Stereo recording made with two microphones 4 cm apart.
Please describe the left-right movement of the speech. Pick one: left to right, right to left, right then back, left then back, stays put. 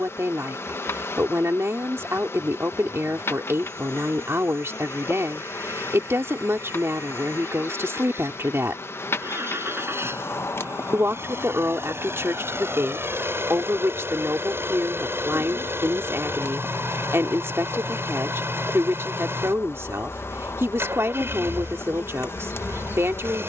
stays put.